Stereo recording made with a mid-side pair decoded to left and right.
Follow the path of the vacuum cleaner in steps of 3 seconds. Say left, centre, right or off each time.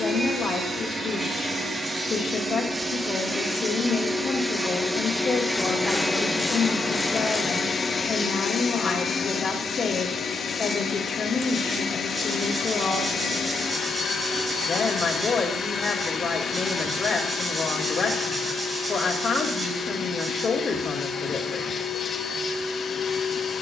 right, centre, left, left, left, left, left, left.